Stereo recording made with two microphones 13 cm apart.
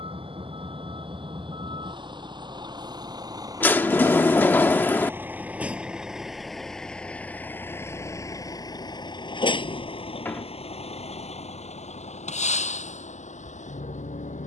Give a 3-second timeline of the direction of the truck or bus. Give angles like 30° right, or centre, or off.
40° right, 20° right, 10° left, 50° left, 70° left.